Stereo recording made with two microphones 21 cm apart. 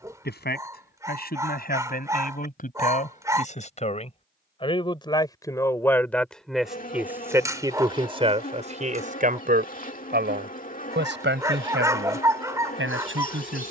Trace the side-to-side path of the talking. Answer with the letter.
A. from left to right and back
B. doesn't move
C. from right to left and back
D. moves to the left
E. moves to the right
E.